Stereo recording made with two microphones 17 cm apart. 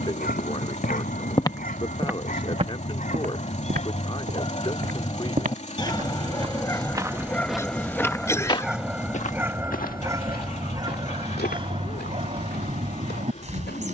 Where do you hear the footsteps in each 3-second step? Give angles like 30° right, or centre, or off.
centre, 50° right, centre, 60° left, 70° left.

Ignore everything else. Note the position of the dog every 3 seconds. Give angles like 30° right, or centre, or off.
50° left, 40° left, 10° left, 20° right, 40° right.